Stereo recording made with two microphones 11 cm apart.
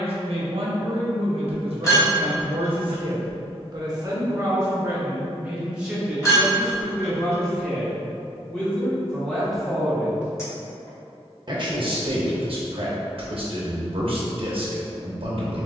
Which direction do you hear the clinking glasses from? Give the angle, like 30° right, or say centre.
30° left.